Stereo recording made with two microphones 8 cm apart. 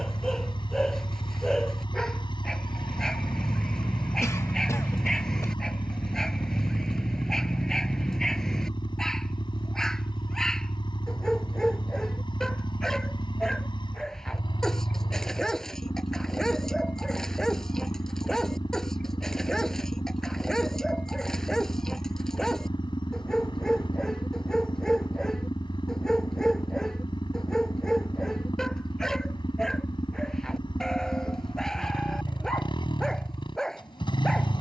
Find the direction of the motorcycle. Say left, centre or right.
left.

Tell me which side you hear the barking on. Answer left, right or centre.
centre.